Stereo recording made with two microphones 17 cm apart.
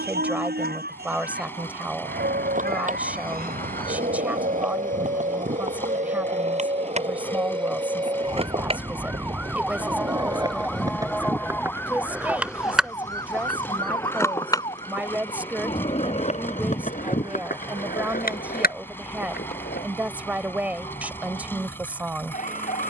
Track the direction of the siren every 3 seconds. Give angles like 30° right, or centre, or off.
70° right, 60° right, 30° right, centre, 20° left, 40° left, 40° left, 50° left.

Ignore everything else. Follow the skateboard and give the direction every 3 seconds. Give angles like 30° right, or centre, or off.
50° right, 50° right, 40° right, 20° right, 10° left, 40° left, 70° left, off.